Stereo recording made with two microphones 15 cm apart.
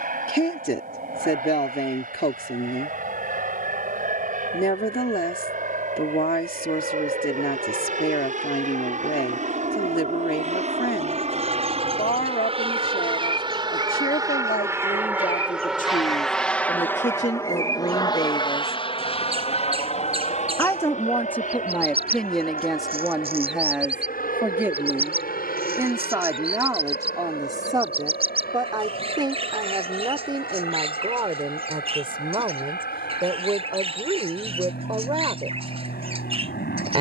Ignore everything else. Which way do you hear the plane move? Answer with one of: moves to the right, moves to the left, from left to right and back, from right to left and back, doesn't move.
moves to the left.